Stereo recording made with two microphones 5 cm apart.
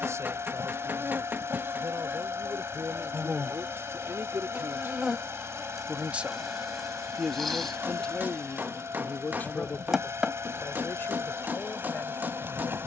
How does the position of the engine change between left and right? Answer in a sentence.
You can hear the engine stay in one place.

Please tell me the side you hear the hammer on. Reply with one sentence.
You can hear the hammer on the right.